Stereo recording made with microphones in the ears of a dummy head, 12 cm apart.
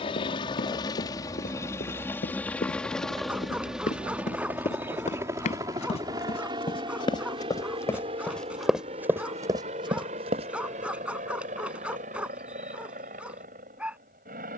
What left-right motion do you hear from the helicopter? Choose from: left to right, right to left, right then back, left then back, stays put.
left to right.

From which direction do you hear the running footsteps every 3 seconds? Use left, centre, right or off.
left, left, left, right, off.